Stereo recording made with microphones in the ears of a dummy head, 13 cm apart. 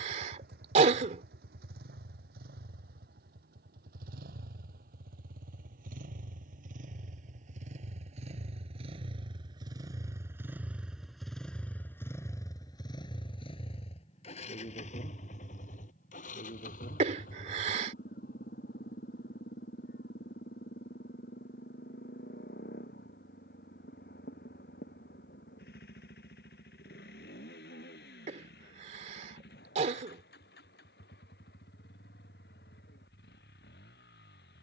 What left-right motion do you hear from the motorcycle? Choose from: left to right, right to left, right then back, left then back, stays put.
right to left.